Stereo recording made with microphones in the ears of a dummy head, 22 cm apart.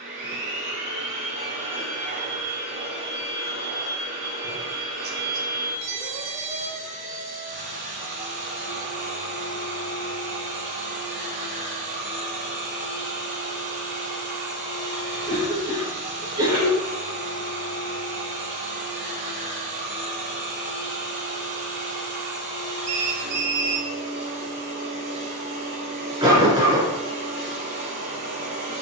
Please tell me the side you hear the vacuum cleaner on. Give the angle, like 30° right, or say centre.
40° right.